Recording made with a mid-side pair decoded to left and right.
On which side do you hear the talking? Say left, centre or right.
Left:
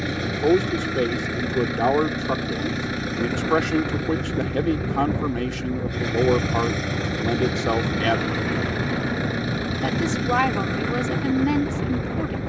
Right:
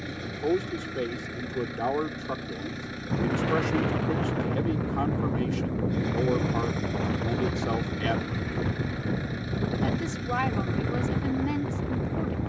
left.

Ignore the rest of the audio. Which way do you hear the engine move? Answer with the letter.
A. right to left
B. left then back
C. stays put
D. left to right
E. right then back
C.